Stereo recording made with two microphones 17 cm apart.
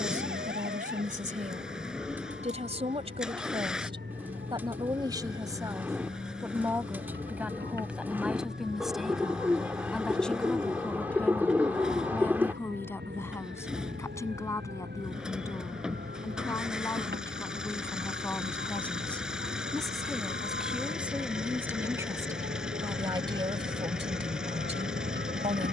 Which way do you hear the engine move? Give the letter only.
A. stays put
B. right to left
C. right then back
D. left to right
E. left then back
A.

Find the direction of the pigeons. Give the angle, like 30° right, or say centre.
10° right.